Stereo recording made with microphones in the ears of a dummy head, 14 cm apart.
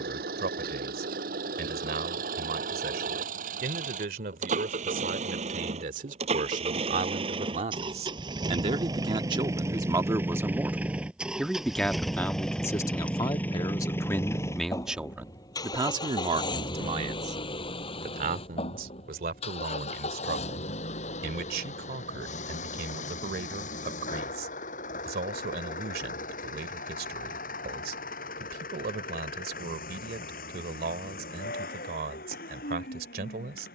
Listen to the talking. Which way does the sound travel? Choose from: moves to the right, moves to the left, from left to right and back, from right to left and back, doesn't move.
from right to left and back.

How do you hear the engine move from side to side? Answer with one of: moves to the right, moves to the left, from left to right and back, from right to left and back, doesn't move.
moves to the left.